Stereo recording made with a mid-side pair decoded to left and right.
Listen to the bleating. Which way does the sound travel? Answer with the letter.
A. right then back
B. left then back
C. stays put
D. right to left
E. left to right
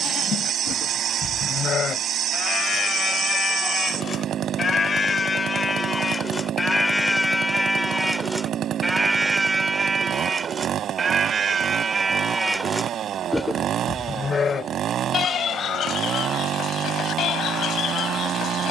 A.